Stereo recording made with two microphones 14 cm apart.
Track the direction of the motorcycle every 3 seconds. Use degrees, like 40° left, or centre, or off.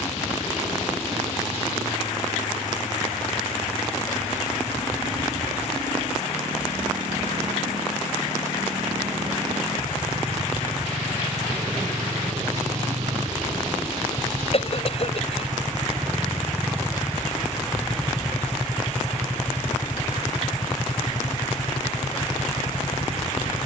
70° right, 60° right, 60° right, 50° right, 40° right, 20° right, 20° left, 40° left.